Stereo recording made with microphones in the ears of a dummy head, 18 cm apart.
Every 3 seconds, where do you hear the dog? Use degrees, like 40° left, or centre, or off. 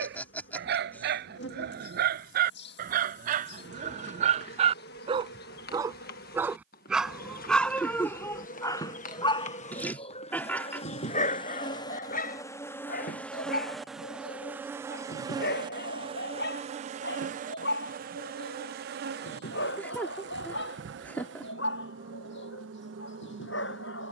60° right, 40° right, 10° left, 40° left, 50° left, 60° left, 70° left, 70° left.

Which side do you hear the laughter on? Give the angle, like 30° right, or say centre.
10° left.